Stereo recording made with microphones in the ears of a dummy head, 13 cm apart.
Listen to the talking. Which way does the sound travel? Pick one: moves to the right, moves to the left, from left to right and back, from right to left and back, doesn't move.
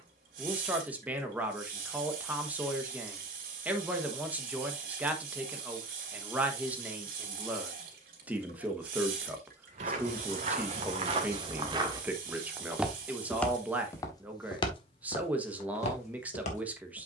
doesn't move.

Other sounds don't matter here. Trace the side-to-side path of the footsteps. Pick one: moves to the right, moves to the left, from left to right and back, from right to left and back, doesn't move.
moves to the left.